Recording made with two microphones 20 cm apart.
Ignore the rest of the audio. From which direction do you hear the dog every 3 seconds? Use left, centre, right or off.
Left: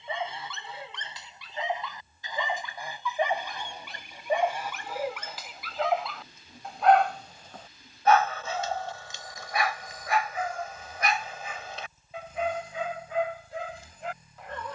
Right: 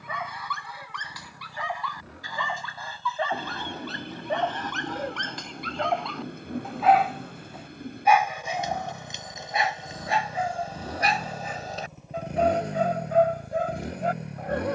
left, centre, centre, right, right.